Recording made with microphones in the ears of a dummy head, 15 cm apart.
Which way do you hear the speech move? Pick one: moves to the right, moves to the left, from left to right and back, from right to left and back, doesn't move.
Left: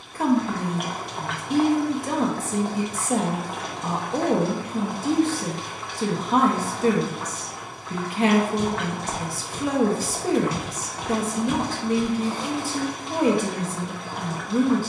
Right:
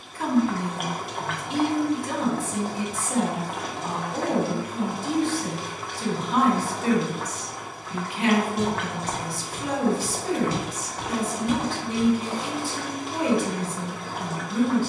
doesn't move.